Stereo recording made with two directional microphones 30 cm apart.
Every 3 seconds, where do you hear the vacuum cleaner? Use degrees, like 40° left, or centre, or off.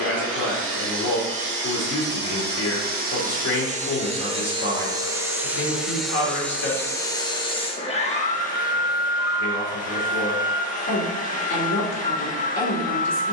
40° right, 20° right, 20° left, 30° left, 30° left.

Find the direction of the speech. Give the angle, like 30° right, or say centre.
50° left.